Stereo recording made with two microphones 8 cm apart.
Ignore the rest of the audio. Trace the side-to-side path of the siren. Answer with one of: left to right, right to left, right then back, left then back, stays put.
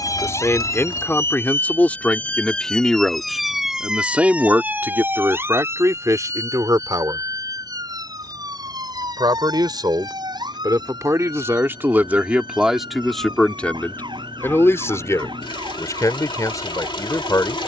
left to right.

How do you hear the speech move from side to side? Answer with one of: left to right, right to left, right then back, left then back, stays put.
right then back.